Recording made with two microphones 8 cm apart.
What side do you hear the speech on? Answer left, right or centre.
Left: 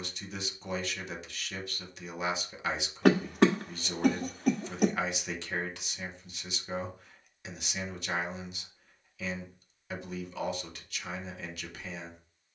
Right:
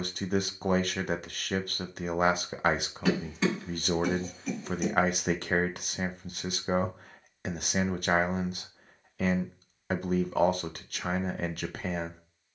right.